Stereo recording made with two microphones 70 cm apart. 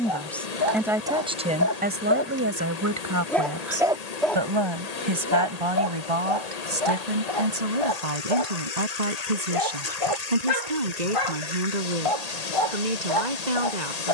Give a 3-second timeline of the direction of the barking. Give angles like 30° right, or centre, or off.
30° left, 10° left, 50° left, 50° left, 50° left.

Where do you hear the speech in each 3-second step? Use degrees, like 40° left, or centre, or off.
10° right, 40° right, 60° right, 70° right, 70° right.